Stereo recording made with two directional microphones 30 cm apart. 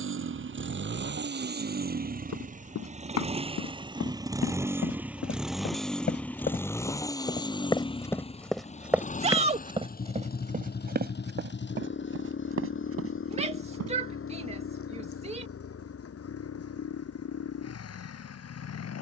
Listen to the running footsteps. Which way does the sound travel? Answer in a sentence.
In this clip you hear the running footsteps travel towards the right.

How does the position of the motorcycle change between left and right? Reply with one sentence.
You can hear the motorcycle move to the left.